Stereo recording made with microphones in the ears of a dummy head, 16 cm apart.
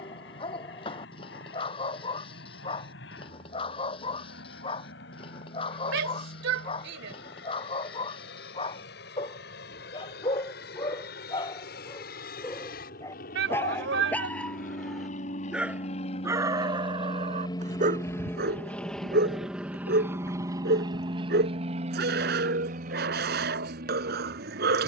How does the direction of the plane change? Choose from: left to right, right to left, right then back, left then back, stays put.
left to right.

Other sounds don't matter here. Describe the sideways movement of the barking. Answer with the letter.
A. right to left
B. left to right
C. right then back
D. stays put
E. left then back
B.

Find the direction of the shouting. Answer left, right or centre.
right.